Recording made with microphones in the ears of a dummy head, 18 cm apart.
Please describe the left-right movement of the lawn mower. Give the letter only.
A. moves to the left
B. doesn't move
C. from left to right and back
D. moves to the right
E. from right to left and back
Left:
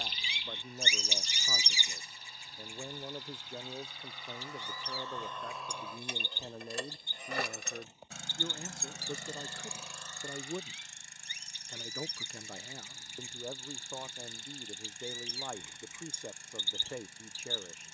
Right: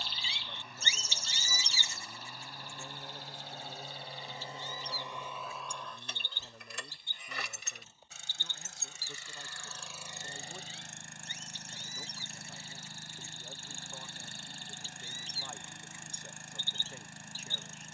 E.